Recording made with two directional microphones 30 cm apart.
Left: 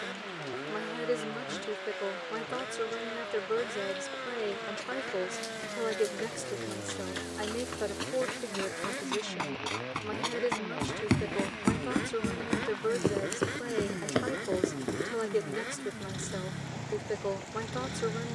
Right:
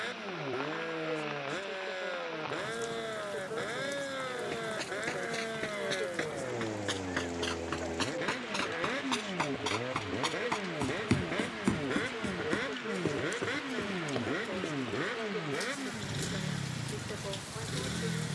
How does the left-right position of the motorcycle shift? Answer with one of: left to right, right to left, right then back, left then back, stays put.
stays put.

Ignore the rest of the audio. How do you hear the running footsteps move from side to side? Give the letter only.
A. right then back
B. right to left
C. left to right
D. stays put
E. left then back
B.